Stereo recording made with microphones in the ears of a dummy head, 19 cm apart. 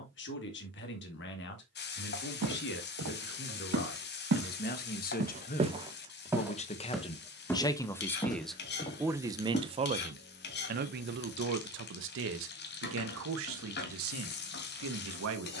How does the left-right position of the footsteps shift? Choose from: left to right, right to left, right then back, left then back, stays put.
right to left.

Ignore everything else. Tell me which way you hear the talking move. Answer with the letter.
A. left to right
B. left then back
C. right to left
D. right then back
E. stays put
A.